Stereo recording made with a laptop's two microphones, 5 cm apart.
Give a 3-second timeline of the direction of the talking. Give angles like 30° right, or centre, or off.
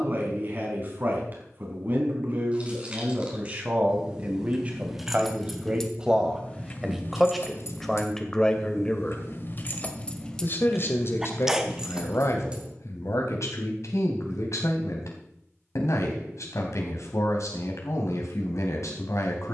40° right, 30° right, centre, 50° left, 70° left, 70° left, 70° left.